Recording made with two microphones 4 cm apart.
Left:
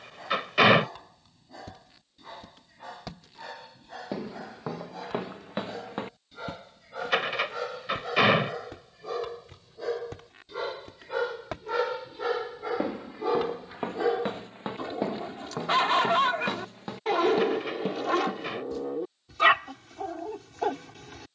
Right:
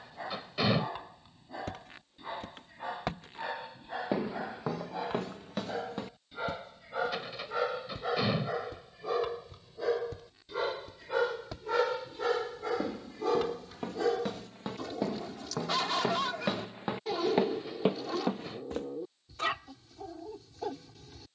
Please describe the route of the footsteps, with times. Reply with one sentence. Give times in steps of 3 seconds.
You can hear the footsteps on the right from 0 s, in the centre from 3 s, on the left from 6 s, in the centre from 15 s and on the right from 18 s.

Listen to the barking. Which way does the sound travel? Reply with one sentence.
In this clip you hear the barking move from right to left.